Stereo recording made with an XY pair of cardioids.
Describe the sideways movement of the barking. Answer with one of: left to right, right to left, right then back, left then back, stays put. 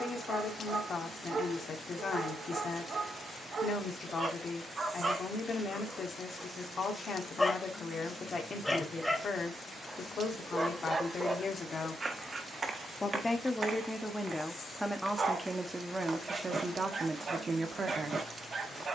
left then back.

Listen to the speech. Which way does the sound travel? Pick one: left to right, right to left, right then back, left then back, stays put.
left to right.